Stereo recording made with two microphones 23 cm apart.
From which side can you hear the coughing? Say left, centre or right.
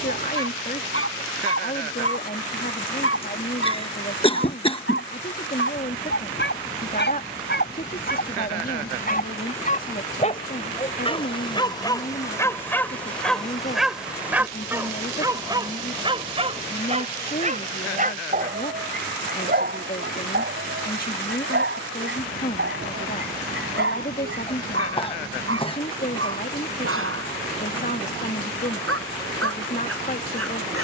left.